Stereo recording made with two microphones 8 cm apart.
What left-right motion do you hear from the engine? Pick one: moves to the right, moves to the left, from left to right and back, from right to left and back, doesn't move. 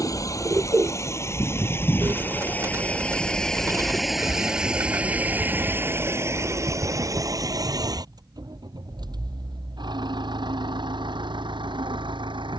moves to the right.